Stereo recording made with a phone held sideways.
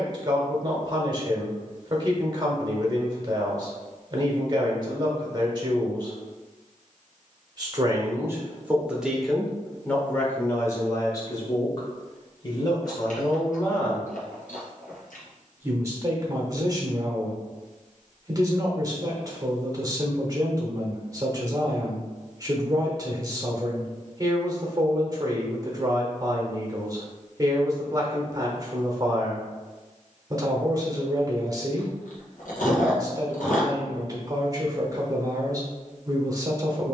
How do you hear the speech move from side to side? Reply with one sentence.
In this clip you hear the speech go left and come back.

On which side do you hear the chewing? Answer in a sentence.
In this clip you hear the chewing on the left.